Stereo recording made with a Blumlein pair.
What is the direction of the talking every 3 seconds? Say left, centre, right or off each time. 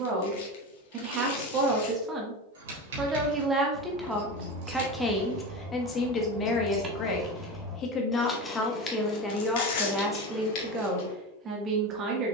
right, centre, left, centre.